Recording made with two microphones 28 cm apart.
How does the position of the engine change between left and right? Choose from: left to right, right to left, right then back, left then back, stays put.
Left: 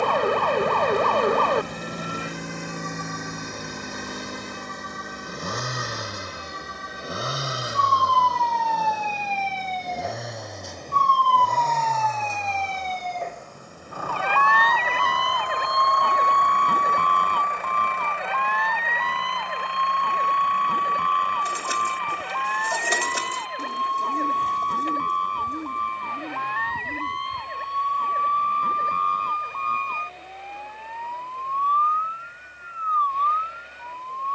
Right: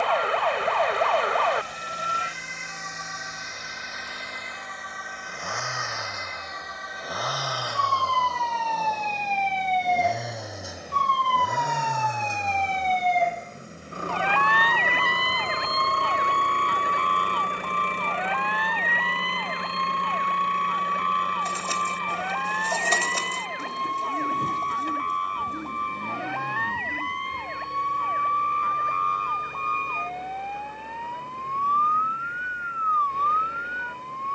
left to right.